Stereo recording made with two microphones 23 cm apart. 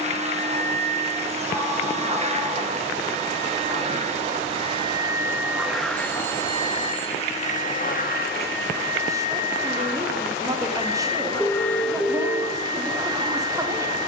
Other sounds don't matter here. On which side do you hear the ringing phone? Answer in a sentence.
You can hear the ringing phone in the centre.